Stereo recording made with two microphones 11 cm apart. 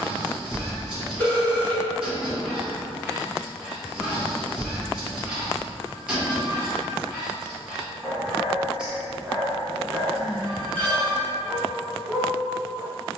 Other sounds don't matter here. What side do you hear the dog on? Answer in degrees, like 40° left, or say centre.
10° right.